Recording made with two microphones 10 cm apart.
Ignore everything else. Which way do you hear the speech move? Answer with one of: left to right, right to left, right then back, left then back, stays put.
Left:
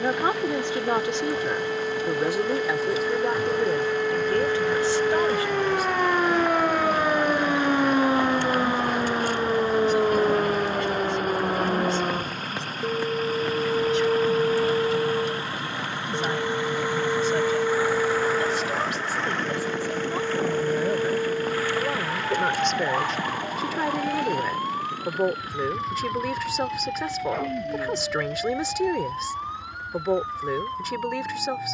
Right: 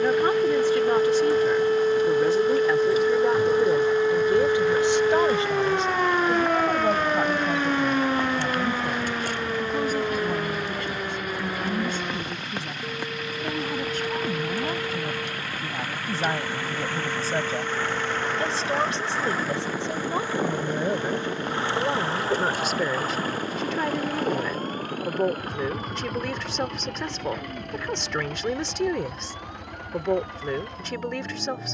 right then back.